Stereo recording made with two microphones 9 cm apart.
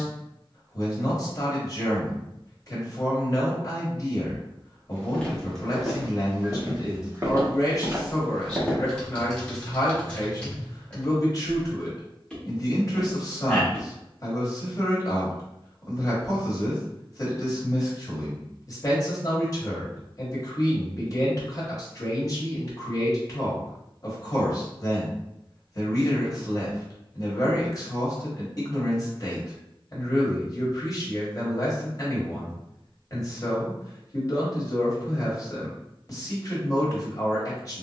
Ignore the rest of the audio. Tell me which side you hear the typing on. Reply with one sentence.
In this clip you hear the typing in the centre.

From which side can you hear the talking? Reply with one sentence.
You can hear the talking on the left.